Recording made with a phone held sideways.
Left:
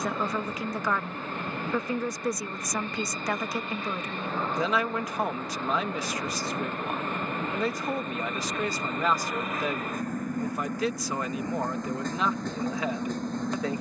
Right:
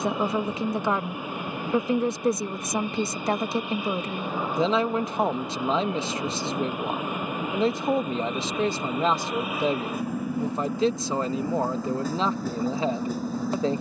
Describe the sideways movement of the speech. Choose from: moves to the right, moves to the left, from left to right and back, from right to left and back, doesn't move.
doesn't move.